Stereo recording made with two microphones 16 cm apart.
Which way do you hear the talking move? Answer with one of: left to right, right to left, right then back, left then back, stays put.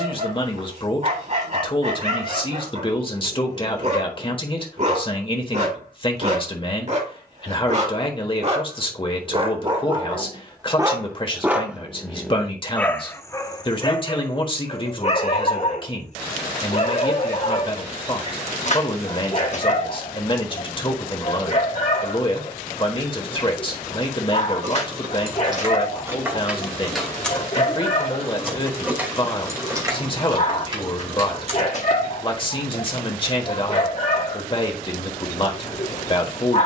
stays put.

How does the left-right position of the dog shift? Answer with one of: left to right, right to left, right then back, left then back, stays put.
right to left.